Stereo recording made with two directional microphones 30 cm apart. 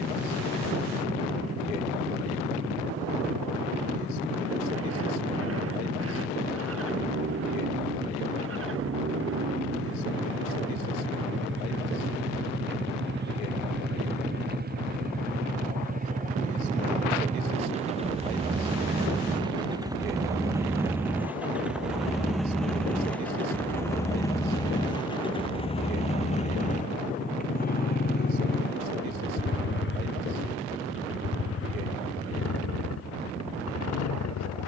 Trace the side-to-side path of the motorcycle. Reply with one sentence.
In this clip you hear the motorcycle move to the left.